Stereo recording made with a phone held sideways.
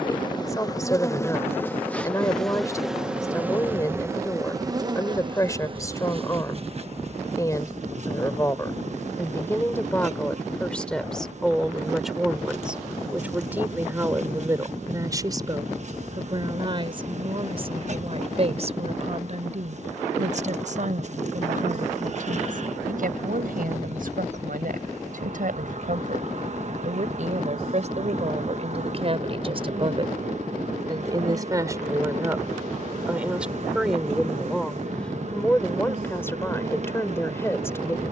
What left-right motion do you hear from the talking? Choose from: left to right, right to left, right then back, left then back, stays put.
right then back.